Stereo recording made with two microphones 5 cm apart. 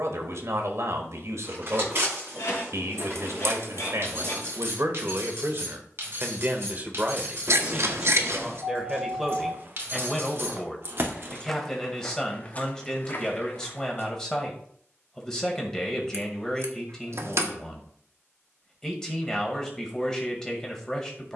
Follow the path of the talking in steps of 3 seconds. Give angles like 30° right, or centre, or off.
70° right, 60° right, 20° right, centre, 10° left, 10° left, 10° left.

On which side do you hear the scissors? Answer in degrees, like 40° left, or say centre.
60° right.